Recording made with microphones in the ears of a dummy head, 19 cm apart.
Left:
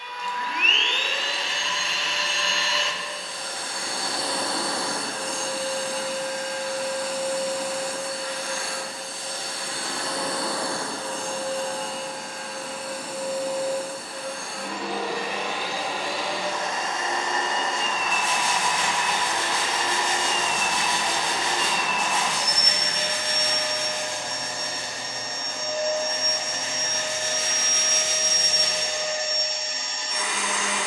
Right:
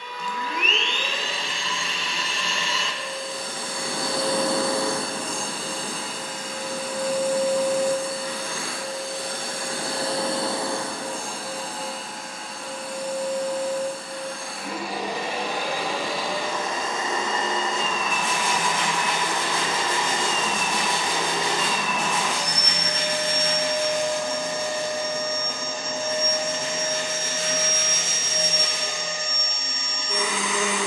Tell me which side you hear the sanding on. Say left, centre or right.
right.